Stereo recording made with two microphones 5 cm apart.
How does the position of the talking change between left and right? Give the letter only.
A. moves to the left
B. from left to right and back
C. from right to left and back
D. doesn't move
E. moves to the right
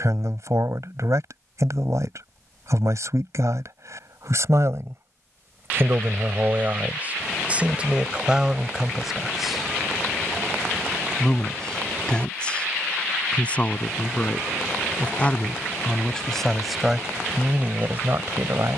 C.